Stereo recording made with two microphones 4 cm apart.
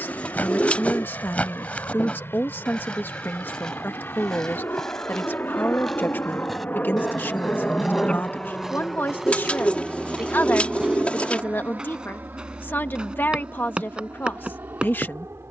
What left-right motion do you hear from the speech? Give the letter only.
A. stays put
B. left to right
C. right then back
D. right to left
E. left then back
A.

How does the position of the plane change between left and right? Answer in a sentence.
You can hear the plane move to the right.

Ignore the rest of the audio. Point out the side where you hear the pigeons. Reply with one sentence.
You can hear the pigeons on the left.